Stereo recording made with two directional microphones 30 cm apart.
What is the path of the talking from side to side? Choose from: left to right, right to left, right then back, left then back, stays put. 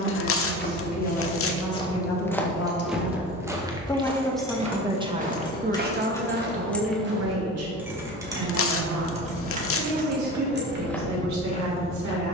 left to right.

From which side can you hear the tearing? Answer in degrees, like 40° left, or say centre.
50° left.